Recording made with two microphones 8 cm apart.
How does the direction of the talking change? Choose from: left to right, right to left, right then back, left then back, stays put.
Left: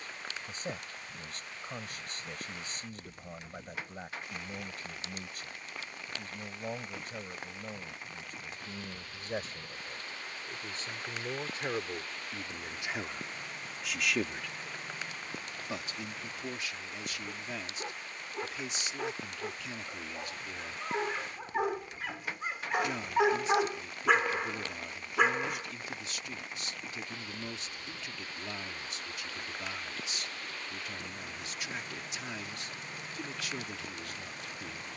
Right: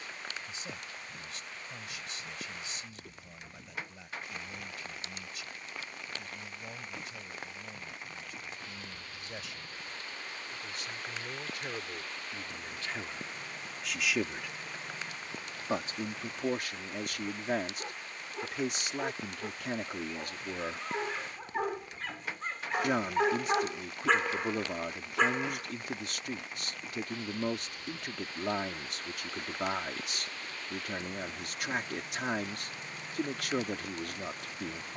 left to right.